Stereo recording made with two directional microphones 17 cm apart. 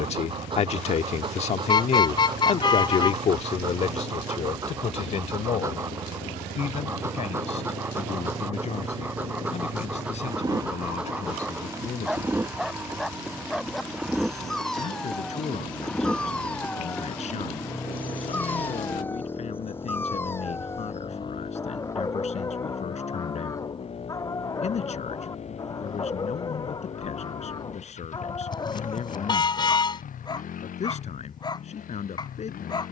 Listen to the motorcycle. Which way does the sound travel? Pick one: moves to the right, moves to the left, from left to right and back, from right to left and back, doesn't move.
moves to the left.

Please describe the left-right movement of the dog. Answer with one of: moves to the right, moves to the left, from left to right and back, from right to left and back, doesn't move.
moves to the left.